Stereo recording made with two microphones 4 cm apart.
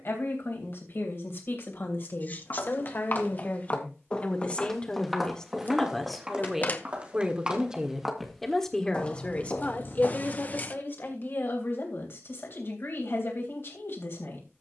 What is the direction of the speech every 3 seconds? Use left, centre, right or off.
left, left, centre, left, left.